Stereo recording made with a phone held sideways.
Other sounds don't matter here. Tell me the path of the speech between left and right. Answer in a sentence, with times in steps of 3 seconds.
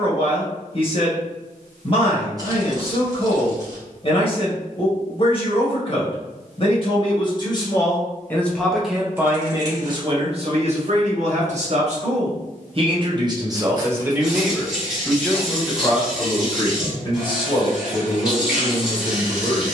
You can hear the speech on the left from 0 s, on the right from 9 s and on the left from 15 s.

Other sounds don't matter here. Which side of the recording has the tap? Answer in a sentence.
You can hear the tap in the centre.